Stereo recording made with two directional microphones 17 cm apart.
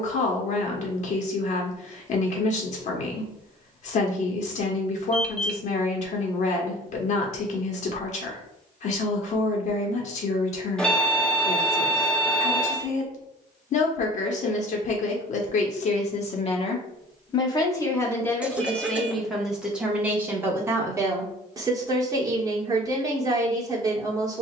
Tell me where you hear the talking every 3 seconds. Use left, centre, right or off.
left, left, left, left, left, left, centre, right.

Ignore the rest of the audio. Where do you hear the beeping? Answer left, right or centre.
centre.